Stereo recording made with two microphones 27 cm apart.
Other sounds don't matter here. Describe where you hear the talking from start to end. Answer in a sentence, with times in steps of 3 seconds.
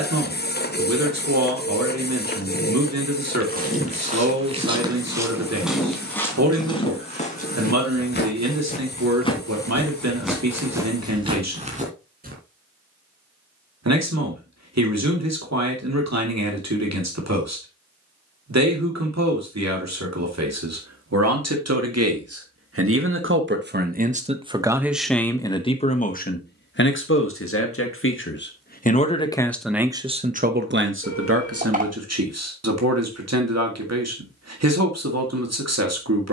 In this clip you hear the talking on the right from 0 s, in the centre from 24 s, on the left from 27 s and on the right from 30 s.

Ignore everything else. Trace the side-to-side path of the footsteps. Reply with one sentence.
You can hear the footsteps go left and come back.